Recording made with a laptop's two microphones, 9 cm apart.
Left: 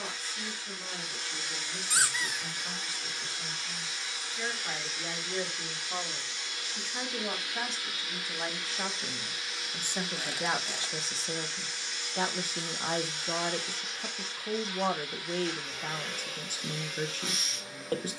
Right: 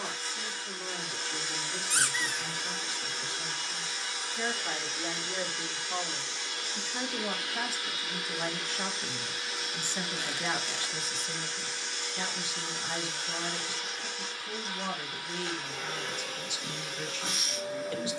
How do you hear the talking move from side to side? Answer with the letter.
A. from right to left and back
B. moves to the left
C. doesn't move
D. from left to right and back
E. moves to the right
B.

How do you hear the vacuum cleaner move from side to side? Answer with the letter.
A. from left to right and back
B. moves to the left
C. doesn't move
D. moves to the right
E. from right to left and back
C.